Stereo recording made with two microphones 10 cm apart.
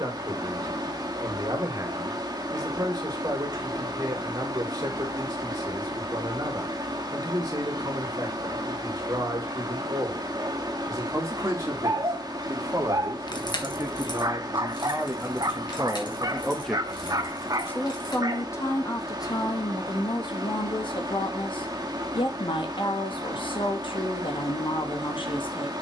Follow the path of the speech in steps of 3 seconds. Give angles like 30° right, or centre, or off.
40° right, 40° right, 40° right, 40° right, 30° right, centre, 40° left, 60° left, 60° left.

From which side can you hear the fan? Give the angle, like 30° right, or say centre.
40° right.